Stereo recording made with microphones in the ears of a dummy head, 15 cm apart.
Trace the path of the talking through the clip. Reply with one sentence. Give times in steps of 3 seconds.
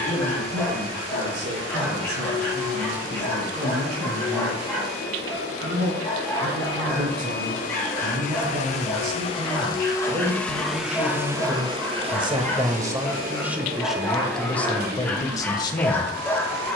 In this clip you hear the talking on the right from 0 s, in the centre from 12 s and on the left from 15 s.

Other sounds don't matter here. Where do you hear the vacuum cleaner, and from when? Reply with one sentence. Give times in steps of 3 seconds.
In this clip you hear the vacuum cleaner on the left from 0 s, in the centre from 9 s and on the right from 12 s.